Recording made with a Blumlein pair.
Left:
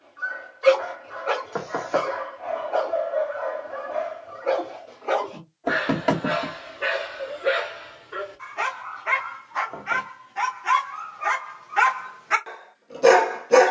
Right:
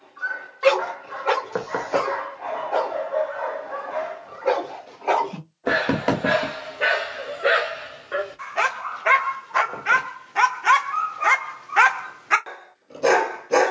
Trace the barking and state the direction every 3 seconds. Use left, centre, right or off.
right, right, right, right, centre.